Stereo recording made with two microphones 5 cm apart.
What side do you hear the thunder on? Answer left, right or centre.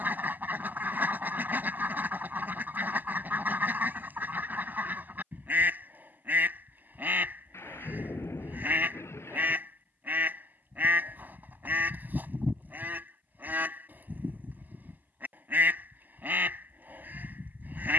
left.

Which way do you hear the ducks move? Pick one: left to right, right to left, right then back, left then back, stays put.
stays put.